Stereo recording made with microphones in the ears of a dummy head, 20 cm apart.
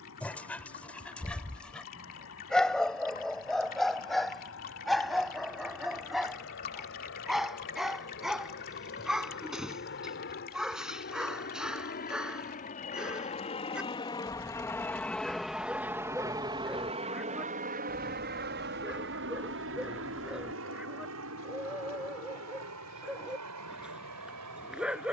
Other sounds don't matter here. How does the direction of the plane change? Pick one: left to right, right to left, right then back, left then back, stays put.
left to right.